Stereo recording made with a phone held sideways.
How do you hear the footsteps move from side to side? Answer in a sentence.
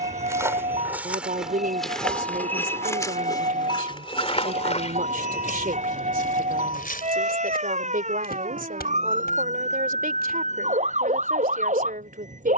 In this clip you hear the footsteps move from right to left.